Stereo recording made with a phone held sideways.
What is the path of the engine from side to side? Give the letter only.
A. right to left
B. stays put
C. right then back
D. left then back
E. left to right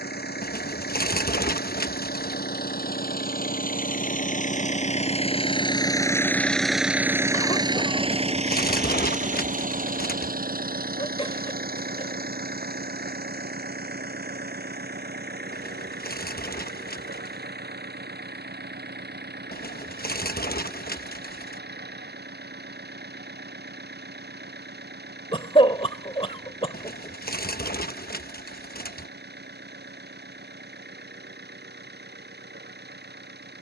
E.